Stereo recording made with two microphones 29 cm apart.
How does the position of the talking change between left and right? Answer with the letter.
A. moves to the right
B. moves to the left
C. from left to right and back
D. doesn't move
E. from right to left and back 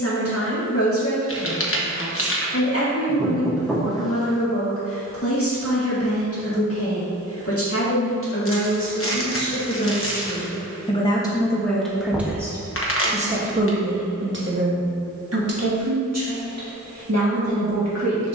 A.